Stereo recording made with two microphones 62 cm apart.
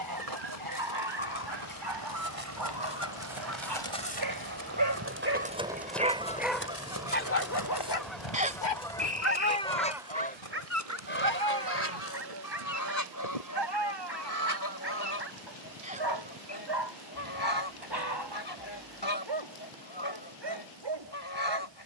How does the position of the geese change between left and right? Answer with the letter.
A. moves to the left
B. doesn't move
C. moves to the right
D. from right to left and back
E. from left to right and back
A.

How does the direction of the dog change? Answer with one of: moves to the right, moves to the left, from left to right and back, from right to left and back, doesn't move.
from right to left and back.